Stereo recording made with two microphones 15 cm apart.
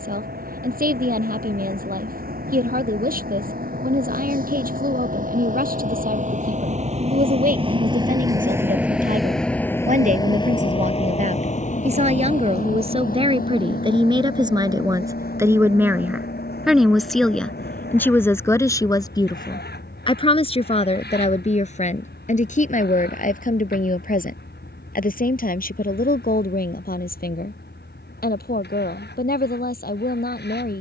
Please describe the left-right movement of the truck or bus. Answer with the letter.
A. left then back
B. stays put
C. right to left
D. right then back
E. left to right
C.